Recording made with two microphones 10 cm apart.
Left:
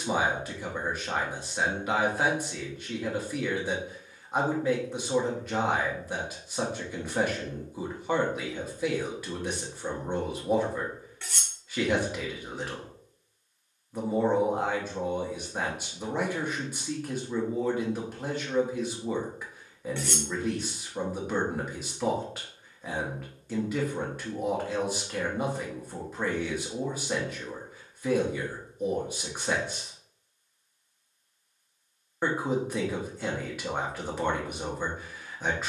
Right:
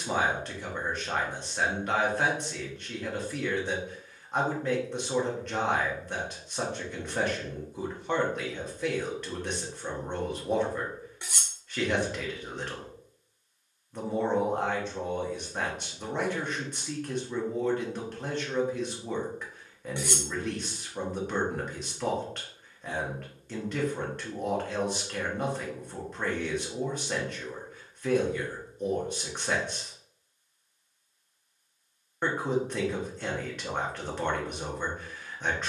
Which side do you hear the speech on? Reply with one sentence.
You can hear the speech in the centre.